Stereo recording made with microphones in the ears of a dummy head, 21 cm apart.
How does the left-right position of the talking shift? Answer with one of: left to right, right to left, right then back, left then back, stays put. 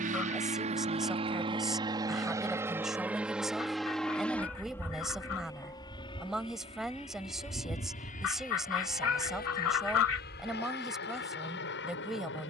stays put.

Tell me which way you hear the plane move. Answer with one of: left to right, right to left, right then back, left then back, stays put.
right to left.